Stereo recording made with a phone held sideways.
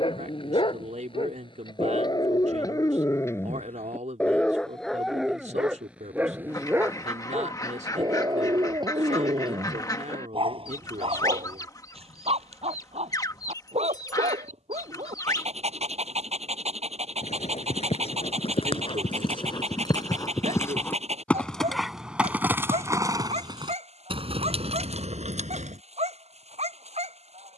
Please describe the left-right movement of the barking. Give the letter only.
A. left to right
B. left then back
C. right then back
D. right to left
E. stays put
A.